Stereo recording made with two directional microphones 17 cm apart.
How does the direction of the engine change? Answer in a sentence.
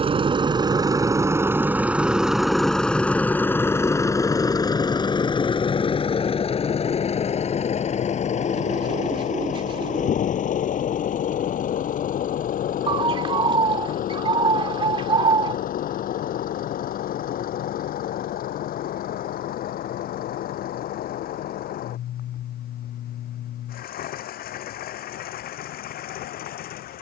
In this clip you hear the engine go from the right side to the left.